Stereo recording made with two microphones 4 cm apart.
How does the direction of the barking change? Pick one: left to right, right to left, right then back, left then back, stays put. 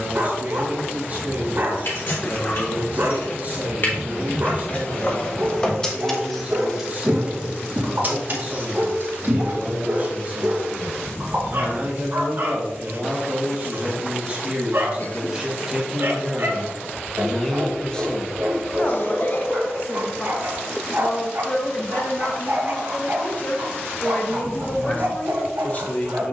stays put.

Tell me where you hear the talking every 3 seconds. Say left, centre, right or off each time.
right, right, right, right, right, centre, left, left, left.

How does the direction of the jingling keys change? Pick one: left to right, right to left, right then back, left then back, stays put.
left to right.